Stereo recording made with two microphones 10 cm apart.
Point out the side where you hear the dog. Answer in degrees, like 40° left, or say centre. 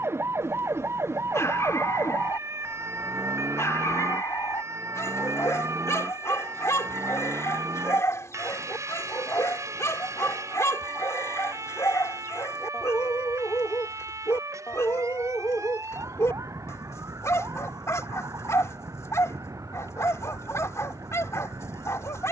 30° left.